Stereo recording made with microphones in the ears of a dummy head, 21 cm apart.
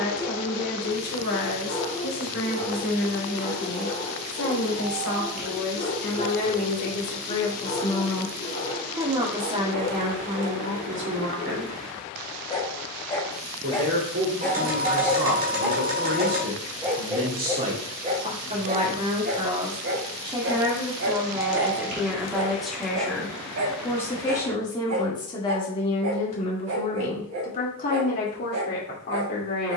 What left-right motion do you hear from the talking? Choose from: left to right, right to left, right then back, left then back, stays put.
right then back.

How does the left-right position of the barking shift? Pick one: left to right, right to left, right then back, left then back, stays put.
left to right.